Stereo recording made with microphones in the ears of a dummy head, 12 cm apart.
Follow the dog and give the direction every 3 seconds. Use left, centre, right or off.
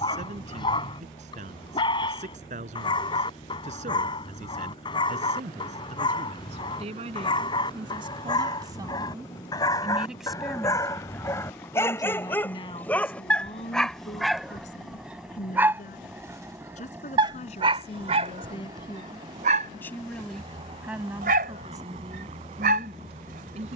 left, left, left, left, centre, right, right, right.